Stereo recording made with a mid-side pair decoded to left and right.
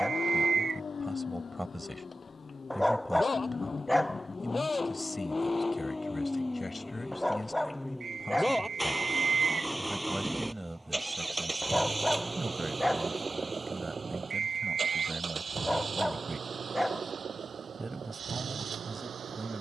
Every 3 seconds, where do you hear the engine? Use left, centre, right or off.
left, left, centre, centre, right, right, right.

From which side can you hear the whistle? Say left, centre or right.
right.